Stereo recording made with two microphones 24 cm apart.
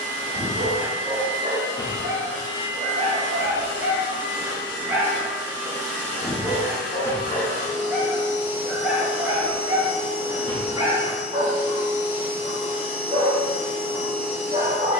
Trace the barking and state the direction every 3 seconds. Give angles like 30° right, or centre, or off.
30° right, 20° right, 10° left, 20° right, 20° right.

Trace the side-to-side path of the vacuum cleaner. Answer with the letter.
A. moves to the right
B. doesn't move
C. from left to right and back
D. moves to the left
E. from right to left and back
B.